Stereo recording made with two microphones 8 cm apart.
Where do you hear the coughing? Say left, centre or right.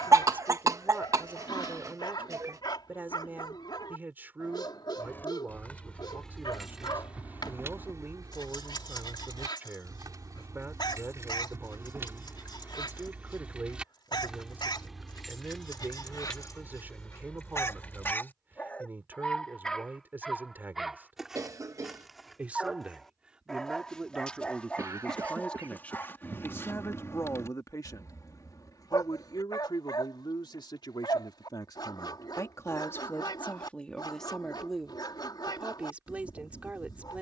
right.